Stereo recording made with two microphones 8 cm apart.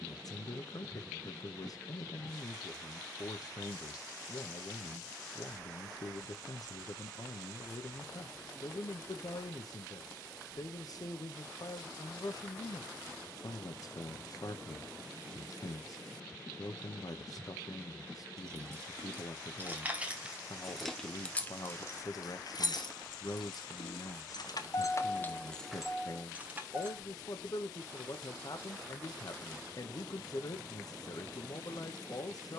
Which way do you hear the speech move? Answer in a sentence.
You can hear the speech stay put.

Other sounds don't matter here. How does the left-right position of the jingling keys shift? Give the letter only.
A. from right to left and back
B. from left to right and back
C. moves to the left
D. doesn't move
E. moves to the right
A.